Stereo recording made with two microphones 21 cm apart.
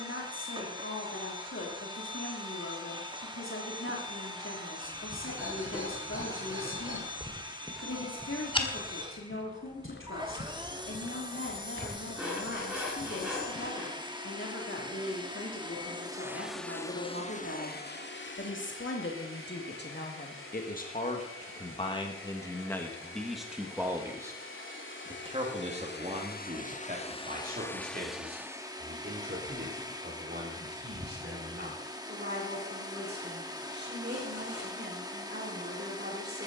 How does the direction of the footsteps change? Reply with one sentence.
You can hear the footsteps travel towards the left.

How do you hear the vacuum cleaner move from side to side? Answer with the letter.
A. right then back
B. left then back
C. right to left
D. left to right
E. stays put
B.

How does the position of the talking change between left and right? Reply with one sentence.
In this clip you hear the talking go from the left side to the right.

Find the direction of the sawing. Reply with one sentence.
You can hear the sawing in the centre.